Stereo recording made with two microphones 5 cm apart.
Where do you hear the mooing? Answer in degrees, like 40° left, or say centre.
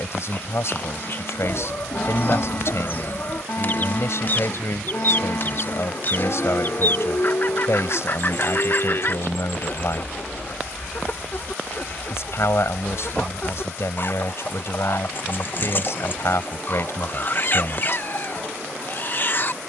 50° left.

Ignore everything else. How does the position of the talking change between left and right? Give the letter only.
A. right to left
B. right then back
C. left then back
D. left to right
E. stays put
E.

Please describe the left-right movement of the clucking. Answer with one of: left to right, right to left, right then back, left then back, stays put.
stays put.